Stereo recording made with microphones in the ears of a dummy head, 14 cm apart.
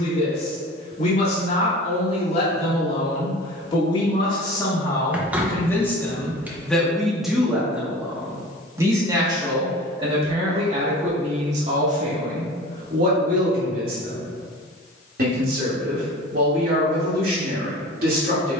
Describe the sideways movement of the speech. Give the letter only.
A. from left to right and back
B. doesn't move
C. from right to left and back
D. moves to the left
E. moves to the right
E.